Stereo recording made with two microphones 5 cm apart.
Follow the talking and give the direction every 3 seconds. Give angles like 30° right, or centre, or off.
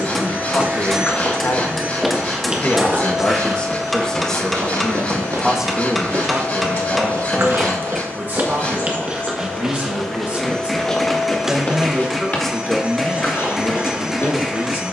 50° left, 10° left, 30° right, 30° right, 30° left.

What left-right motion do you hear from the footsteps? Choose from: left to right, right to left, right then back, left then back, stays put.
right then back.